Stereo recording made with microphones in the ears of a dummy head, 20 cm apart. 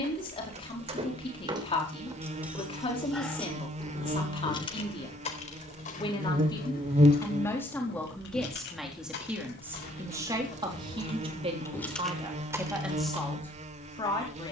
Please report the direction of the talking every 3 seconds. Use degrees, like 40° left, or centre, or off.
20° left, 20° left, 10° left, 20° right, centre.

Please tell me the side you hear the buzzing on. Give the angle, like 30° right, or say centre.
30° right.